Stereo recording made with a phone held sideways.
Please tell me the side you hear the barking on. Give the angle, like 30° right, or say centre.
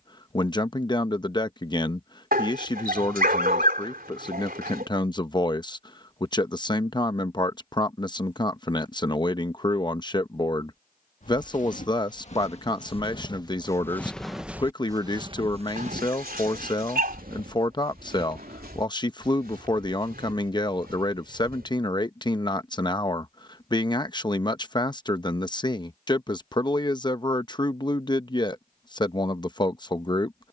70° right.